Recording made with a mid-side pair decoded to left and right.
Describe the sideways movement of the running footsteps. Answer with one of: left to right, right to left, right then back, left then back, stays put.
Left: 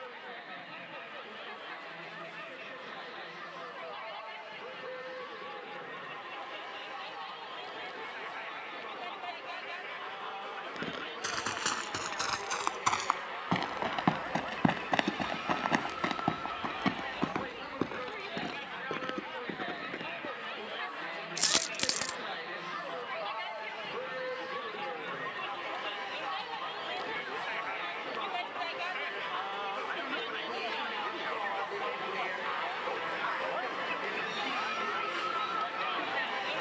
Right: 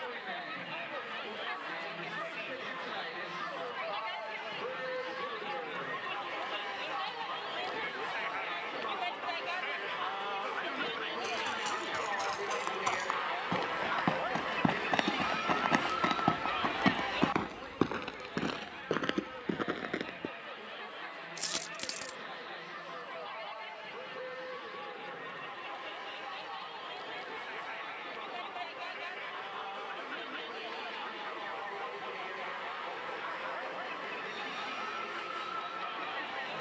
left to right.